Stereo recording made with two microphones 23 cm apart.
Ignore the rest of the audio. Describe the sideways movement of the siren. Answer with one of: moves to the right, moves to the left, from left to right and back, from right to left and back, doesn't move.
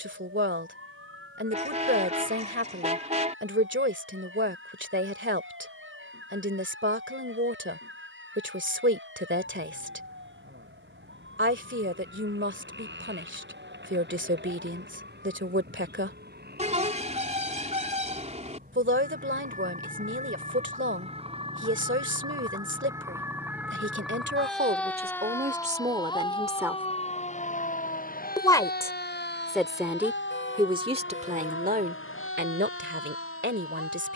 moves to the left.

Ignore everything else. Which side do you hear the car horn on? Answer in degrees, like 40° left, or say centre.
30° right.